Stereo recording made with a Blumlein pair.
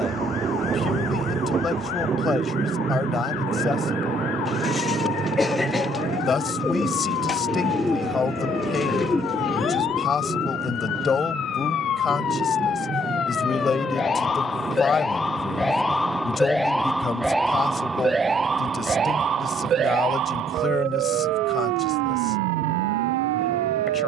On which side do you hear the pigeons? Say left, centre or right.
centre.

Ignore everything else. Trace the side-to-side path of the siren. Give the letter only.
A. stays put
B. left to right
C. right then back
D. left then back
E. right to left
B.